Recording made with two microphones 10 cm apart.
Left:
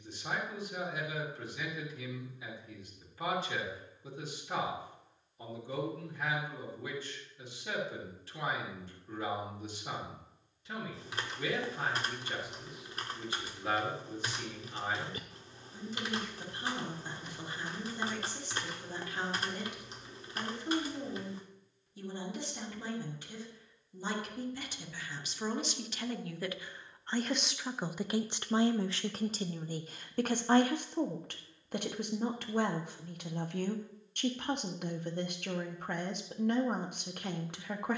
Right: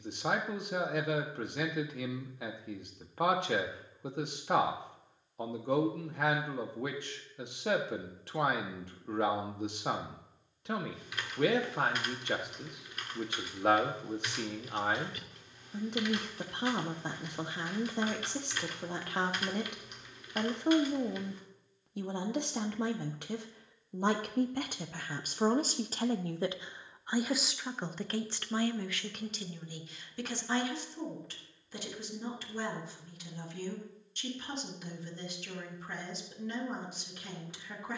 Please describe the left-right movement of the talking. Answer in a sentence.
You can hear the talking move from right to left.